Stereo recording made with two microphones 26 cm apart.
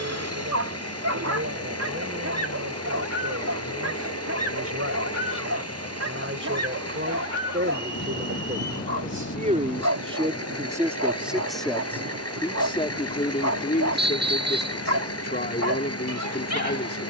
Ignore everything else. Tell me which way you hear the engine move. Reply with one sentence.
In this clip you hear the engine stay in one place.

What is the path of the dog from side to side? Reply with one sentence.
You can hear the dog stay put.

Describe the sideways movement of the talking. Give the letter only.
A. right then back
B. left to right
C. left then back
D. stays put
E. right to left
E.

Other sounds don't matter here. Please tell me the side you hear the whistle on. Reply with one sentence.
In this clip you hear the whistle on the right.